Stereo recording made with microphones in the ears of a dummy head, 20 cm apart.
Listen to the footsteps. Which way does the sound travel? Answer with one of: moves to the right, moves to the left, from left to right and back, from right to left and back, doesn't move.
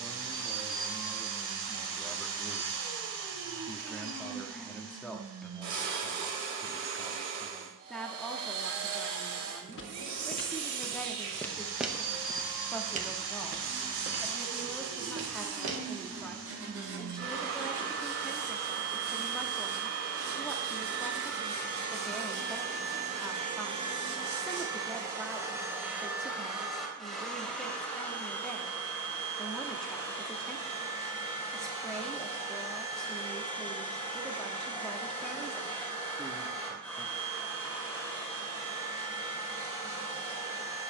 moves to the right.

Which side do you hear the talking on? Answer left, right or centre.
centre.